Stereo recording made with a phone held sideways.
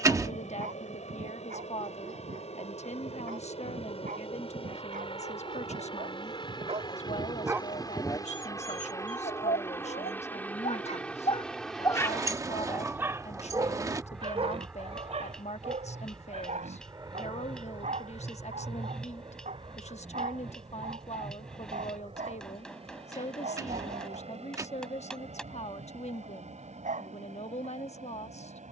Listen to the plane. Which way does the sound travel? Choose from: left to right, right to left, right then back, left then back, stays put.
left to right.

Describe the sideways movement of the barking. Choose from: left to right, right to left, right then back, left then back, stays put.
left then back.